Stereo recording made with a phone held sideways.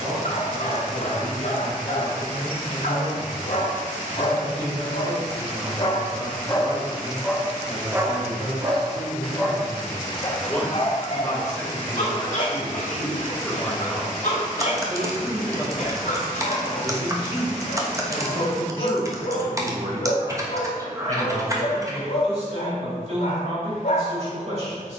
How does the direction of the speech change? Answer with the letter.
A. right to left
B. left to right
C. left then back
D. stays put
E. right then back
C.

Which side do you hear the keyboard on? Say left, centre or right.
right.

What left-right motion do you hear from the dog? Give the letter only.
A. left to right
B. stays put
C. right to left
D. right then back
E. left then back
D.